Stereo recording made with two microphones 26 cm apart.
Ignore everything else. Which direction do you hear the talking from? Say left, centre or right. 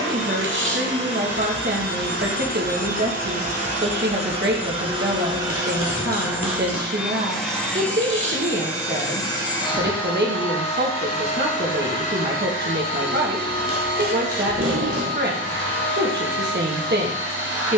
right.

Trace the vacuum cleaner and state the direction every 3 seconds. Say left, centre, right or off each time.
right, right, centre, left, left, left.